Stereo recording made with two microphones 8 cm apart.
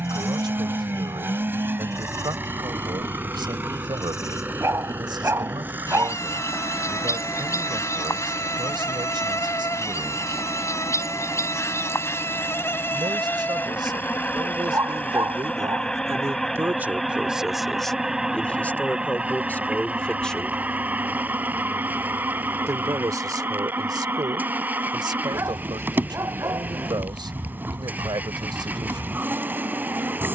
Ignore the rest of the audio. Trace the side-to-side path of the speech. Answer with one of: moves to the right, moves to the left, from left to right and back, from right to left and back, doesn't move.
from right to left and back.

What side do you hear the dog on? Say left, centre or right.
right.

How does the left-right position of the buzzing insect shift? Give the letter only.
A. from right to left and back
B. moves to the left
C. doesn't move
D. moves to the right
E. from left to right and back
D.